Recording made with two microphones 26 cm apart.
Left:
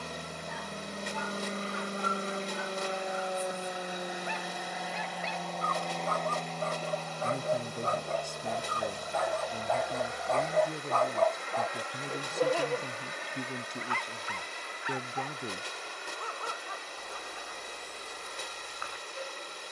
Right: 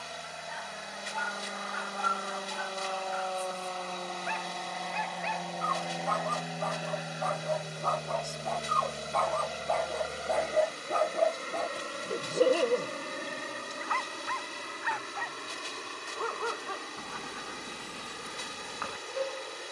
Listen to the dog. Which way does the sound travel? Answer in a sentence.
In this clip you hear the dog move from left to right.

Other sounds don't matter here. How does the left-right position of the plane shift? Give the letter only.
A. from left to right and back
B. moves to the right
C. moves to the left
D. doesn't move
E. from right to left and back
B.